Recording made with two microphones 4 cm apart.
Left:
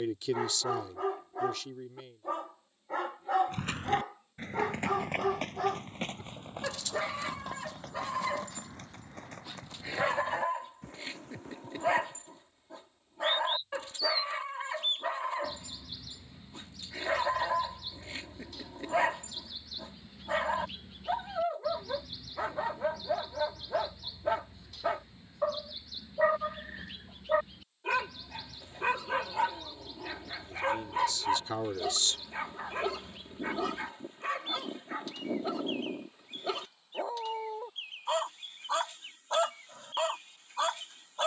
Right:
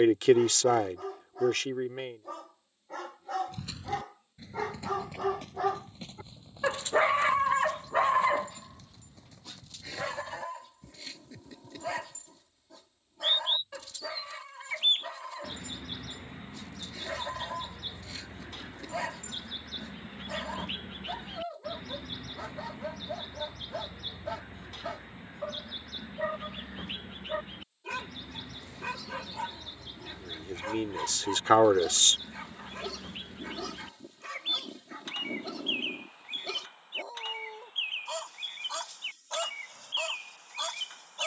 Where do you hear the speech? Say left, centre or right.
right.